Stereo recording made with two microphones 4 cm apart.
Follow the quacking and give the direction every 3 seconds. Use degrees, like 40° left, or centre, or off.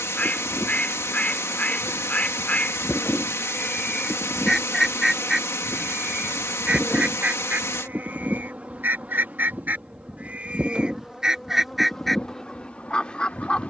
30° left, 10° left, 40° right, 30° right, 20° left.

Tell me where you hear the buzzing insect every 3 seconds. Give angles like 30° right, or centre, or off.
40° left, 10° left, 20° right, 10° right, 30° left.